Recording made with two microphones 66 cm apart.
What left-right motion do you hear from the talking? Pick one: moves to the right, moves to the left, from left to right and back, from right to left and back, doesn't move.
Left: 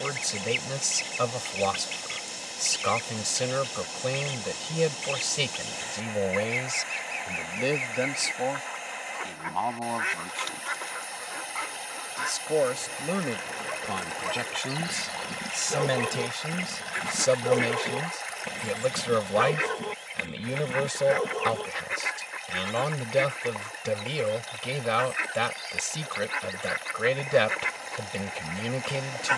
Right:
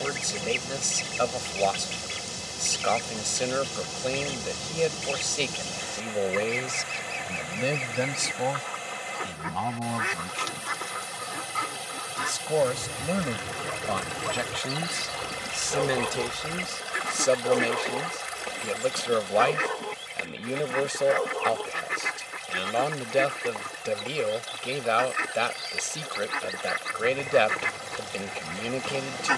from left to right and back.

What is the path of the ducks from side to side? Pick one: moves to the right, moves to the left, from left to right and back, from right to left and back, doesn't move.
doesn't move.